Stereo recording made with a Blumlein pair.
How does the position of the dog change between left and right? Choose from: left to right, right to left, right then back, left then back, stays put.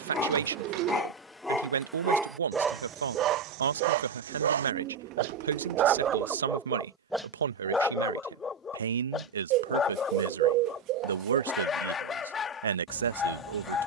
right then back.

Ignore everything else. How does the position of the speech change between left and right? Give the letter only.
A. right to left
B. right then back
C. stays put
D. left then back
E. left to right
C.